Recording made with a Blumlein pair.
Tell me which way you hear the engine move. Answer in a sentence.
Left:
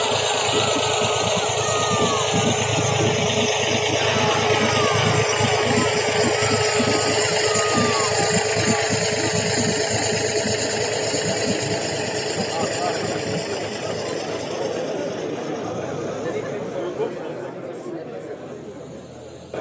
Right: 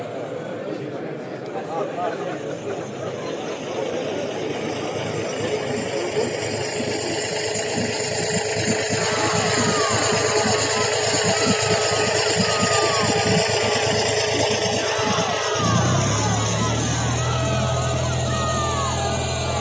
You can hear the engine move to the right.